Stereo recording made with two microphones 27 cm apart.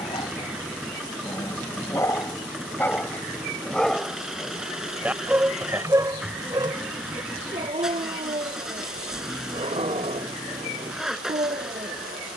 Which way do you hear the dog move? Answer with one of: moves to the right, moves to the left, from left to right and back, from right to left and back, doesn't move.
moves to the right.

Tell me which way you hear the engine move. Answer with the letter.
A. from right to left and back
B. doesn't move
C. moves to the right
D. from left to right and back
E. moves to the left
B.